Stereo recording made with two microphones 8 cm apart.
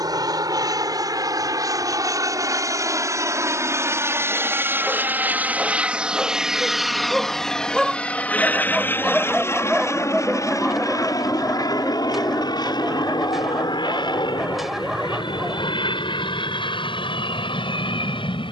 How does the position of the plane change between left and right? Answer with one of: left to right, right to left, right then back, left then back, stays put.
right to left.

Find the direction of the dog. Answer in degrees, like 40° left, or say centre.
centre.